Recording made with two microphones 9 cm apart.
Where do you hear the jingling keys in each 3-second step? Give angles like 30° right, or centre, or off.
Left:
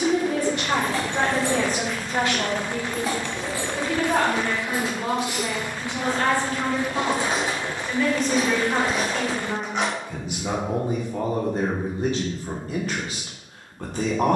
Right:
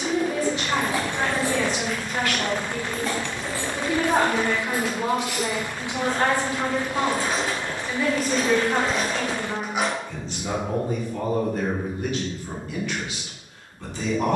10° right, 20° left, 20° left, 10° right, off.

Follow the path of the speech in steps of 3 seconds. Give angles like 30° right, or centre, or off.
40° left, 20° right, 10° right, 20° left, 40° left.